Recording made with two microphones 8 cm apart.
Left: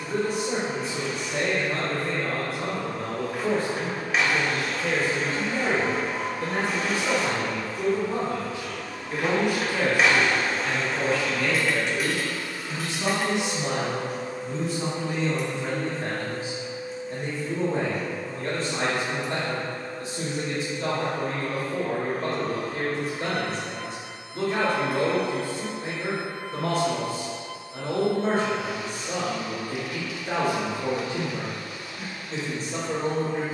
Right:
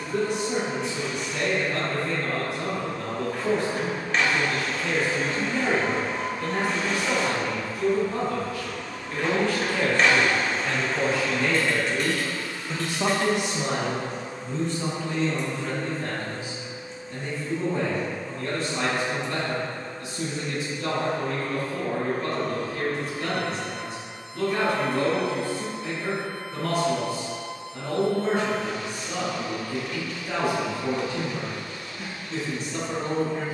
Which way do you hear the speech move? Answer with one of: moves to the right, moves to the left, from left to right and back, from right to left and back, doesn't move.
from left to right and back.